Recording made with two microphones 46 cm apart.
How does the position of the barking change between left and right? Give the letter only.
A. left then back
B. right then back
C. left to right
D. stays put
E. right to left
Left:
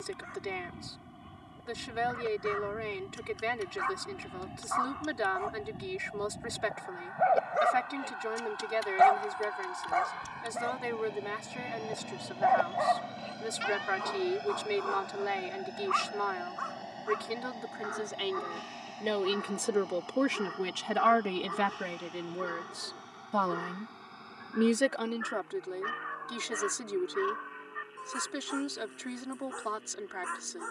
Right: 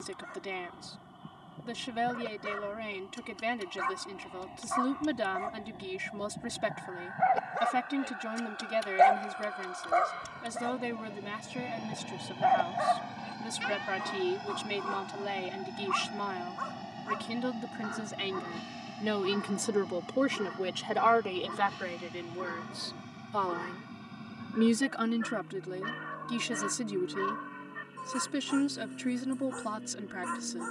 A.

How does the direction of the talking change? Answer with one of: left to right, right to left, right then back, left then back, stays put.
left then back.